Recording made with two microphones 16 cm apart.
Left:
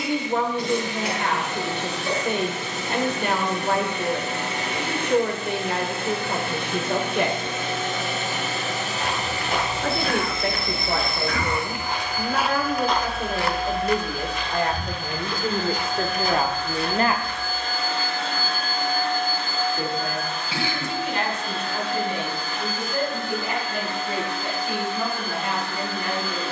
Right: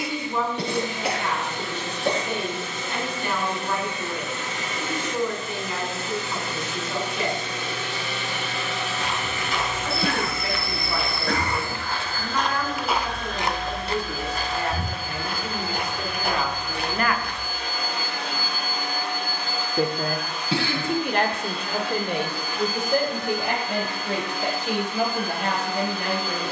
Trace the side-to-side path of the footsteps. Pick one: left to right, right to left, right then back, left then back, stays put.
left to right.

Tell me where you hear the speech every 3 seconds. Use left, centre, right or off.
left, left, left, left, left, left, right, right, right.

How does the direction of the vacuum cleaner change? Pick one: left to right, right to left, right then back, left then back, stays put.
left to right.